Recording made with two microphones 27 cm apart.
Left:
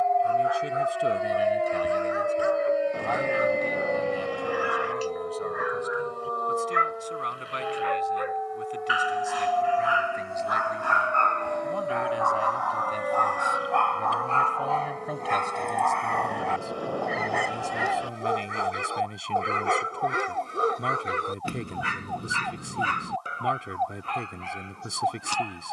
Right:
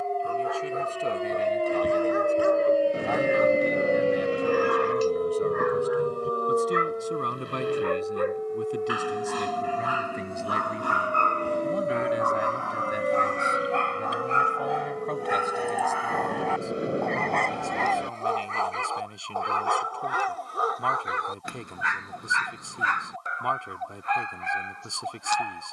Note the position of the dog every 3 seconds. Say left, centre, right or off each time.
right, right, right, right, right, centre, left, left, left.